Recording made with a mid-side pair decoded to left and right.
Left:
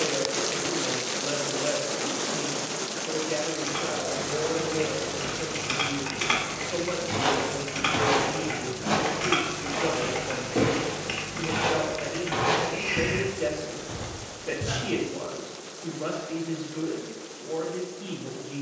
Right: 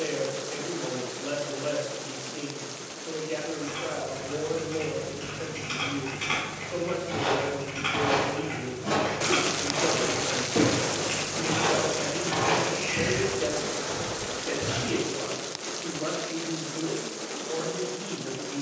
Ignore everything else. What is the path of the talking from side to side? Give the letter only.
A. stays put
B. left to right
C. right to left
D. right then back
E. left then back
A.